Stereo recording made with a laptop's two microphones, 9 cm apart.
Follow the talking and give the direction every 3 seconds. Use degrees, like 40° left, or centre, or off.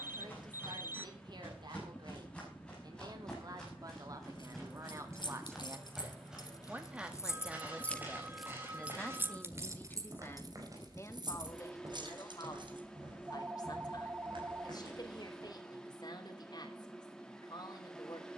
50° right, 40° right, 10° right, 20° left, 50° left, 50° left.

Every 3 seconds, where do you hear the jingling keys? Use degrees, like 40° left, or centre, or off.
off, 60° left, 30° left, 40° right, 60° right, off.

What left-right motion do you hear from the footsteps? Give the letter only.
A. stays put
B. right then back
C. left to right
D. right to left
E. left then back
C.